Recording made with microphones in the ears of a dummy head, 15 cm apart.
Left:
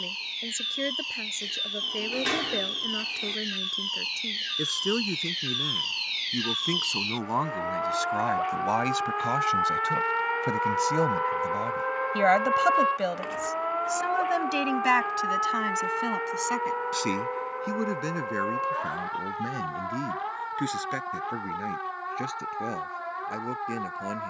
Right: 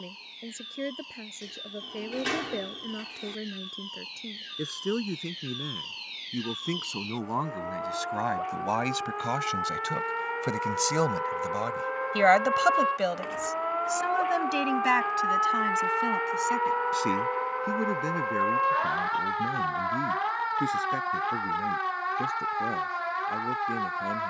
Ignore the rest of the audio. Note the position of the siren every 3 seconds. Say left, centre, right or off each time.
left, left, left, left, centre, right, right, right.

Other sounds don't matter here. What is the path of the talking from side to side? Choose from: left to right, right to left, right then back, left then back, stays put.
right then back.